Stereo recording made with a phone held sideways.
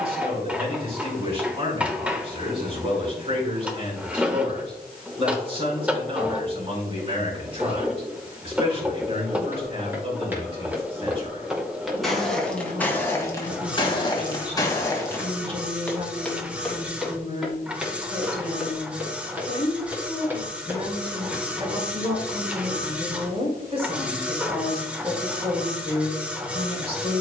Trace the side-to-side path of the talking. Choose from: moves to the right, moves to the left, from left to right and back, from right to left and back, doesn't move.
doesn't move.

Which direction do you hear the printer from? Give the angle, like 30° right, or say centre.
10° right.